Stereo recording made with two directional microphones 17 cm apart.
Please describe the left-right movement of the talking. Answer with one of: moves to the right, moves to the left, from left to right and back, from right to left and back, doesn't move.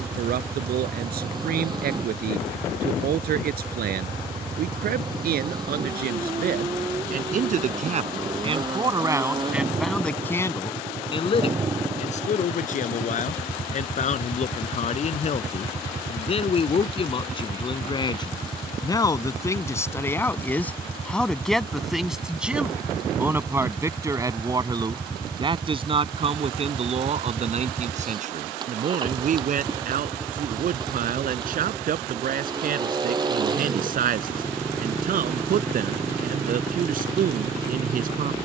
from right to left and back.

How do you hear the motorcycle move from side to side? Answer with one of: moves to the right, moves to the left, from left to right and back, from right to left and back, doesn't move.
doesn't move.